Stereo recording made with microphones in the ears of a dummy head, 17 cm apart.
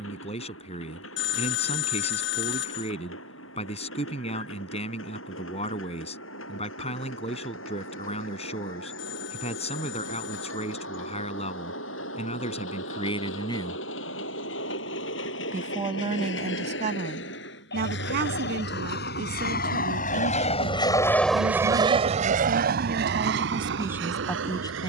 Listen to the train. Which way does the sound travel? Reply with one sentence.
You can hear the train move to the right.